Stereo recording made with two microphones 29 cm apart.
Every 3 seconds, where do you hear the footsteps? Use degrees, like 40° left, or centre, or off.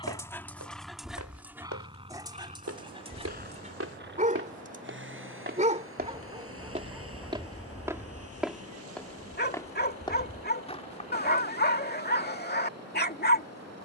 70° right, 50° right, 20° right, 20° left, off.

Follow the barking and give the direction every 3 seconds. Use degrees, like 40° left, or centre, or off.
centre, 20° right, 10° left, 30° left, 30° left.